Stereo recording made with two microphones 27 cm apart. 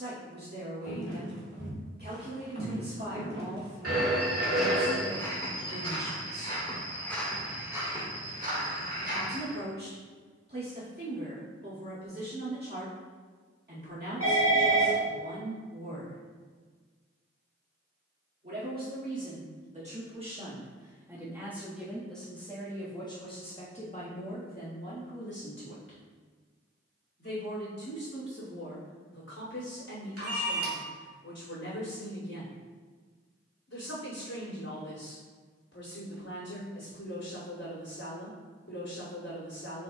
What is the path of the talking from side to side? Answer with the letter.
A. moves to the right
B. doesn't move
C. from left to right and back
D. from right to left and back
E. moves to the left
E.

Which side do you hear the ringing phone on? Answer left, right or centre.
right.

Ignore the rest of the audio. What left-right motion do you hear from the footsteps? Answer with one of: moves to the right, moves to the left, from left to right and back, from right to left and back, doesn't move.
from right to left and back.